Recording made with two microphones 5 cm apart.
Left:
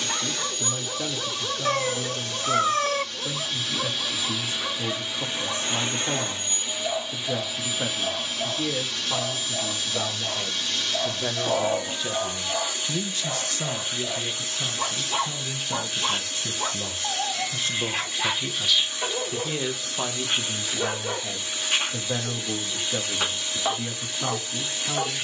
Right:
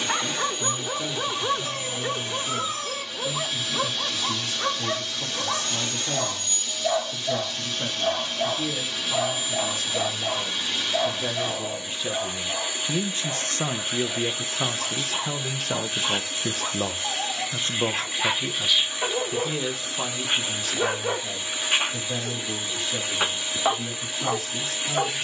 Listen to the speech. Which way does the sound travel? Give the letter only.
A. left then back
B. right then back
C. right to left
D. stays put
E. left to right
B.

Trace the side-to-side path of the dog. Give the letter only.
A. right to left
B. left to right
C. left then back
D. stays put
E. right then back
C.